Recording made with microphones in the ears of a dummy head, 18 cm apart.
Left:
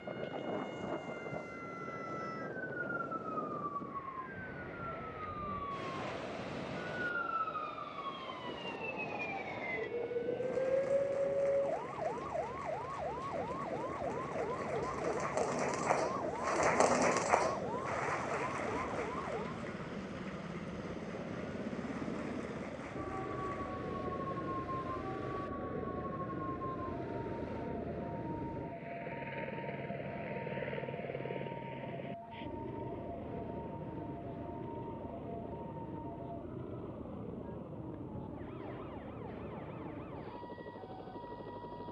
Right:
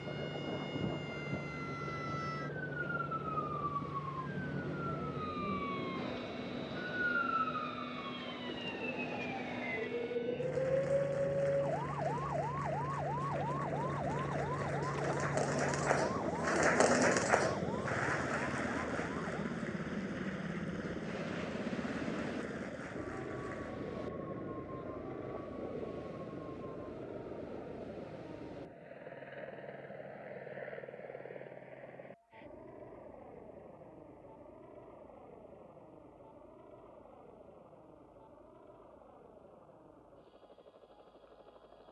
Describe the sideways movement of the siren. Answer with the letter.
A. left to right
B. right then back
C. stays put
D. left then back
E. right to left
E.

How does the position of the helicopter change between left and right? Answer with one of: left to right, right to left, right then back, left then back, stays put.
right to left.